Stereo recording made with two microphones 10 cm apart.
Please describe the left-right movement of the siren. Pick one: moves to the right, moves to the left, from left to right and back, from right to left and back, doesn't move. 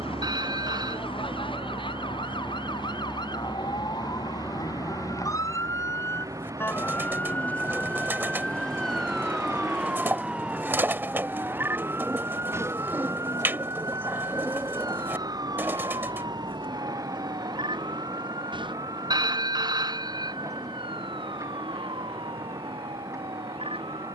moves to the right.